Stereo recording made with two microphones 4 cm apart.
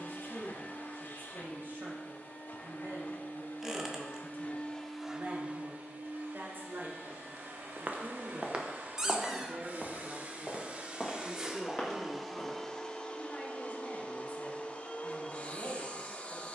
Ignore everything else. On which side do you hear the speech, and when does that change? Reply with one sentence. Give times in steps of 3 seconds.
In this clip you hear the speech on the right from 0 s, in the centre from 9 s and on the left from 12 s.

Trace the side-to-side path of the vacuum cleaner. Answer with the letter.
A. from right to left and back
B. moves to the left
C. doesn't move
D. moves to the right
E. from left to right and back
E.